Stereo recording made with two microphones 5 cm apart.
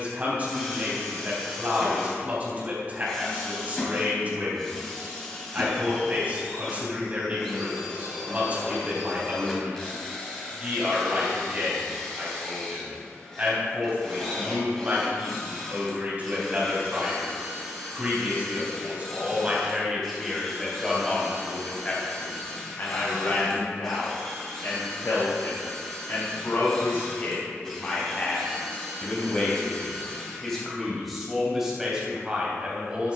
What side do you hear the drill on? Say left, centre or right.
centre.